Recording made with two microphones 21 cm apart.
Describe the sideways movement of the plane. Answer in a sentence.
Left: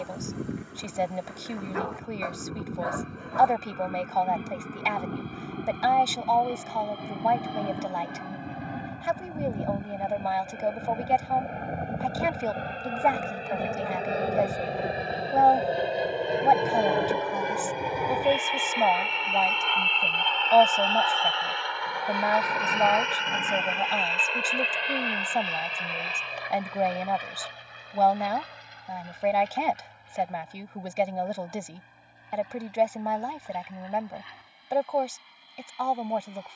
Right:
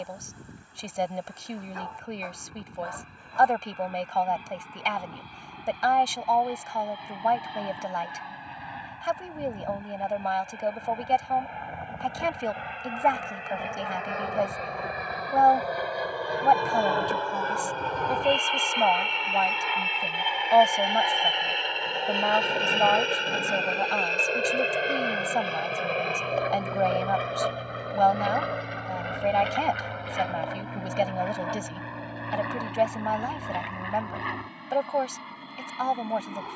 In this clip you hear the plane move from left to right.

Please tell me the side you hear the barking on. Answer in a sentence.
You can hear the barking on the left.